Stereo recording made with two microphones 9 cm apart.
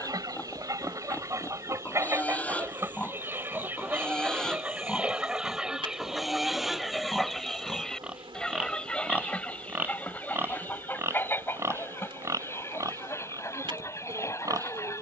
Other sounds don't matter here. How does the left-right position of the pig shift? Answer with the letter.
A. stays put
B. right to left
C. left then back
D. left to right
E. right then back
D.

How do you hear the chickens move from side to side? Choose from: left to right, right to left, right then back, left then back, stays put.
right to left.